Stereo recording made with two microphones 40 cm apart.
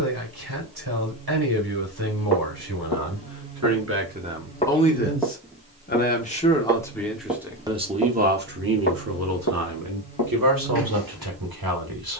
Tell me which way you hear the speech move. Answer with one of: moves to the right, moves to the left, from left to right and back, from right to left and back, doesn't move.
from right to left and back.